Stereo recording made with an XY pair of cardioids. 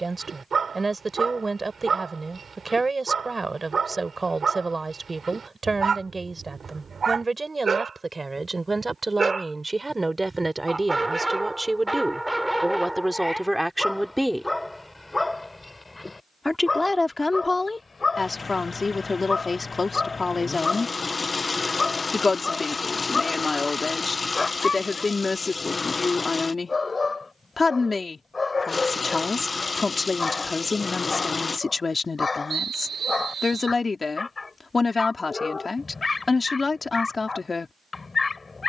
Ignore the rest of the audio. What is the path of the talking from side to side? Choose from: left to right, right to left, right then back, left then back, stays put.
right to left.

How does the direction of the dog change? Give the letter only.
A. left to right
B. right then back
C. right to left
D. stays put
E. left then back
C.